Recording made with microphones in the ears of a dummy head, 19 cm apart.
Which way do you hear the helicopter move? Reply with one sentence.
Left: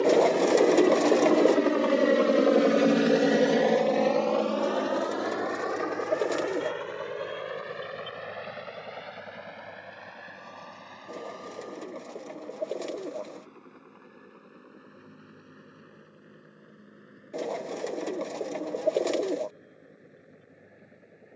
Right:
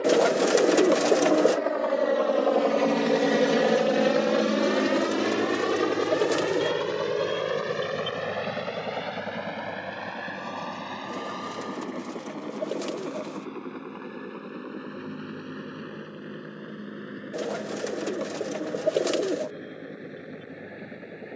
In this clip you hear the helicopter go from the left side to the right.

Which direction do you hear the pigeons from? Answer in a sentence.
In this clip you hear the pigeons in the centre.